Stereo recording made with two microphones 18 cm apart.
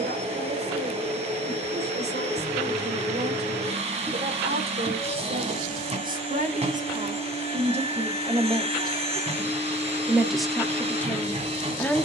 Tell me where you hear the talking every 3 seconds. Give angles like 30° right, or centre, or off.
70° right, 60° right, 40° right, centre.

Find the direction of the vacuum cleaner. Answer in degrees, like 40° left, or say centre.
40° right.